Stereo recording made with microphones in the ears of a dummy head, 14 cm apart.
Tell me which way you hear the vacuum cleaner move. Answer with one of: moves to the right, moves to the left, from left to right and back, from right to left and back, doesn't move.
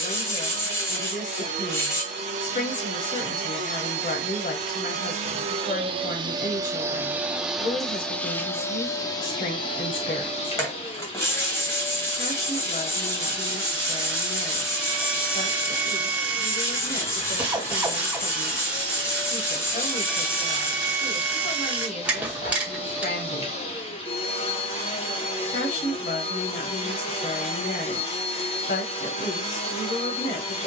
moves to the left.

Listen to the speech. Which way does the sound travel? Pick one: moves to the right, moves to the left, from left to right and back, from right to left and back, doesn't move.
doesn't move.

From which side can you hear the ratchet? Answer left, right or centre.
centre.